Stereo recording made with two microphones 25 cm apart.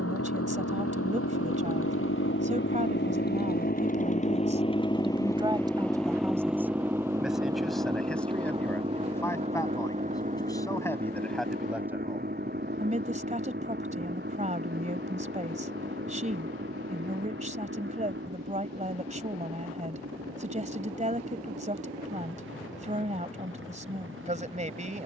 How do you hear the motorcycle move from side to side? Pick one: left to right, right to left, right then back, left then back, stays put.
left to right.